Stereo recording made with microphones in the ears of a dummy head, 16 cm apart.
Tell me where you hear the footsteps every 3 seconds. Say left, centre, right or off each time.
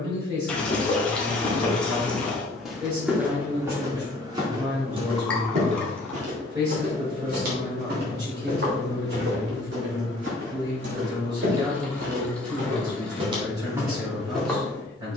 centre, right, right, right, right.